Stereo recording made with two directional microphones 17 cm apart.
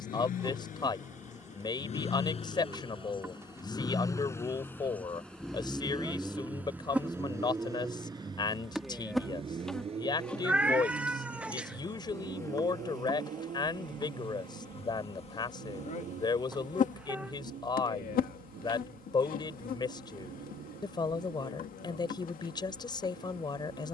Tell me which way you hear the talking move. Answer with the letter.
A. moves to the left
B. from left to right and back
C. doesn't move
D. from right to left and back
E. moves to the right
C.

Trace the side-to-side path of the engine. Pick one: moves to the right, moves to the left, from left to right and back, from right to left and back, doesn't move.
moves to the right.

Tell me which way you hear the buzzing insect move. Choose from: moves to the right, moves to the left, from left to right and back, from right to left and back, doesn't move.
moves to the left.